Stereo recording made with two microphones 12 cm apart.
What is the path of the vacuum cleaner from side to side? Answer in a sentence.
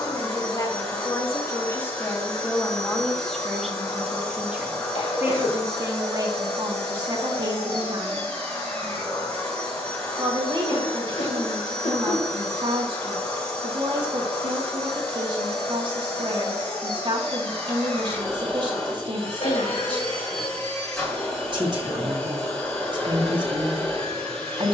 In this clip you hear the vacuum cleaner stay put.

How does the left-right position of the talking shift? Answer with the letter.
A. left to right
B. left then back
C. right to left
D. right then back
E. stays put
A.